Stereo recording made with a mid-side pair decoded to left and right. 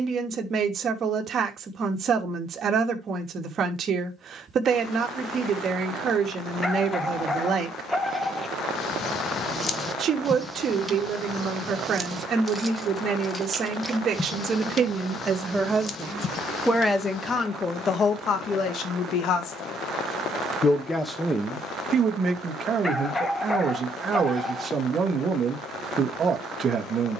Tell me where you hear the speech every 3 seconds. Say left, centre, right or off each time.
right, right, right, right, right, centre, left, right, right.